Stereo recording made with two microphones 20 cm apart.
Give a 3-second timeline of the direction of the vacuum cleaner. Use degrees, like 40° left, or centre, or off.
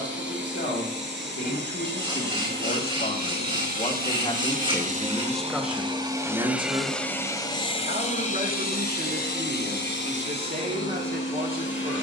60° right, 40° right, 20° left, 70° left.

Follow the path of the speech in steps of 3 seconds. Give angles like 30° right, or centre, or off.
60° left, 20° left, 40° right, 50° right.